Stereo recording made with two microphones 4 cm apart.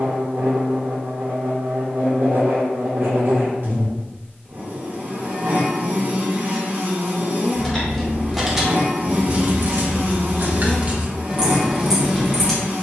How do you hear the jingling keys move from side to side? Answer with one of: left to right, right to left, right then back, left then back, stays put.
right then back.